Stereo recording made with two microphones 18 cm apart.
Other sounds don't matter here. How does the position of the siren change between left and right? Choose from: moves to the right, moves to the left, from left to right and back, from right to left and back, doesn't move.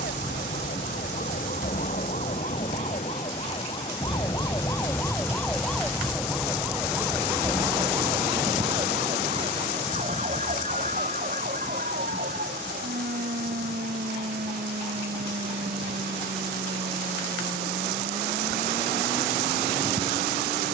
moves to the right.